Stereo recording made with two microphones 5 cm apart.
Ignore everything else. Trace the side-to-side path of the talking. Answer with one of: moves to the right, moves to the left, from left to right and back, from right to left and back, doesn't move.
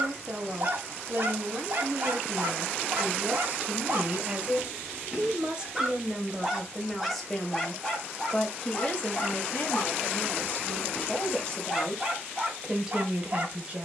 from right to left and back.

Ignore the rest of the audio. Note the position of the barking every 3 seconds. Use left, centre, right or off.
right, right, centre, centre, right.